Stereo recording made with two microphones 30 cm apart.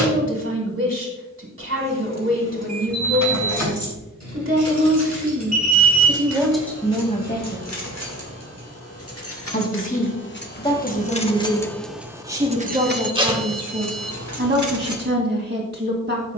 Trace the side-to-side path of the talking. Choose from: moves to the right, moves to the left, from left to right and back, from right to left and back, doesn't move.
from right to left and back.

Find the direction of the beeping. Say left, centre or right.
right.